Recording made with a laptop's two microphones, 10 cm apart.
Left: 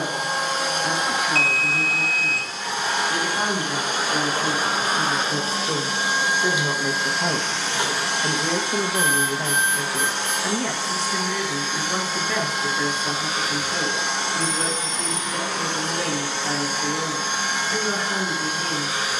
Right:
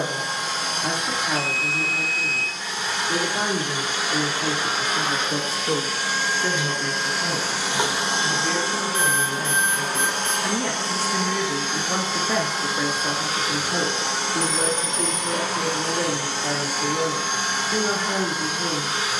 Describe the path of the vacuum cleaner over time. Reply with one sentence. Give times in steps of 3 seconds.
In this clip you hear the vacuum cleaner on the left from 0 s, in the centre from 6 s and on the right from 9 s.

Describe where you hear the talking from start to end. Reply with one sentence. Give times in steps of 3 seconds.
You can hear the talking on the right from 0 s, on the left from 6 s, in the centre from 9 s and on the right from 12 s.